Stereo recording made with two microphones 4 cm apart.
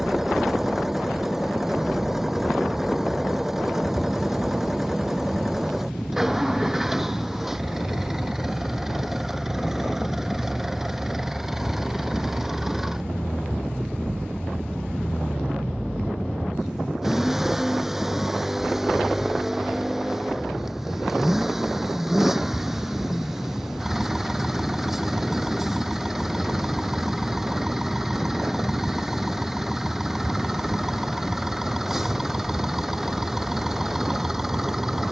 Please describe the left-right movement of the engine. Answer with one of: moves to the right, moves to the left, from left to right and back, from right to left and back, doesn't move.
doesn't move.